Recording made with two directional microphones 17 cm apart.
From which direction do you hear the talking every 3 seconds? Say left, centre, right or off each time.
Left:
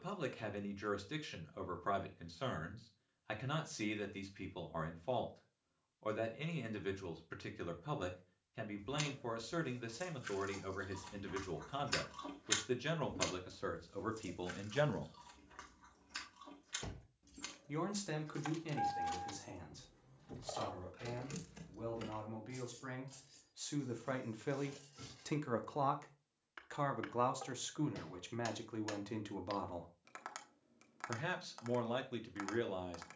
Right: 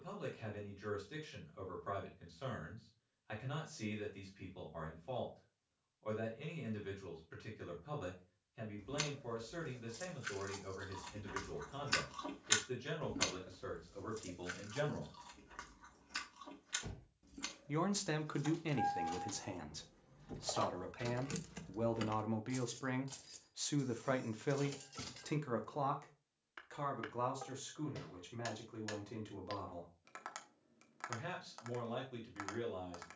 left, left, left, left, left, centre, right, right, centre, left, left.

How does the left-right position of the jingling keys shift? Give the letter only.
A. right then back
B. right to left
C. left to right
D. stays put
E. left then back
C.